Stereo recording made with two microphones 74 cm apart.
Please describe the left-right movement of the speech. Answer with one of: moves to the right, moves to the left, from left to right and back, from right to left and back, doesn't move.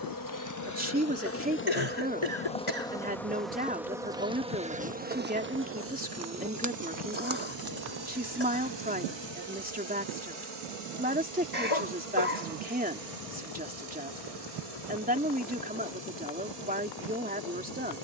doesn't move.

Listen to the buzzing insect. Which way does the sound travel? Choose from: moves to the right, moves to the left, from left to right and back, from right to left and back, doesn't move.
moves to the right.